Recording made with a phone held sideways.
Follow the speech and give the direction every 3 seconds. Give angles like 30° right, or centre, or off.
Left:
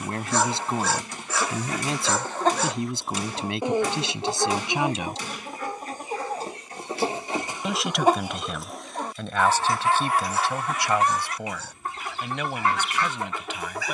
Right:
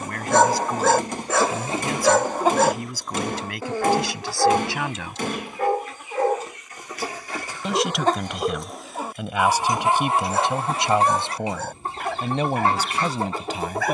30° left, 20° left, centre, 20° right, 40° right.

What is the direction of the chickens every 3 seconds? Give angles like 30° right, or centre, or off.
30° right, 30° left, 20° left, 30° right, 30° right.